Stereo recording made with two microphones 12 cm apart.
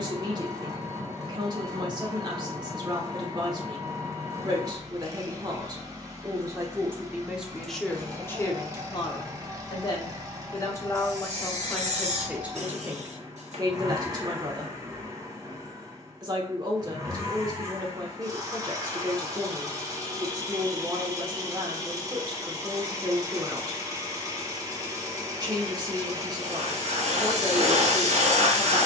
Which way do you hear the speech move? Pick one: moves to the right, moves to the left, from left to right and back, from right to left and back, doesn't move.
from right to left and back.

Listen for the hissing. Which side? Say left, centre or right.
right.